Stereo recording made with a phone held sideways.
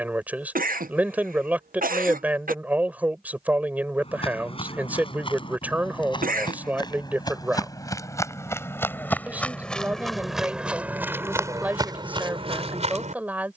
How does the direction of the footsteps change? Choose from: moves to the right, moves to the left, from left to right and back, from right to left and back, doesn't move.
moves to the right.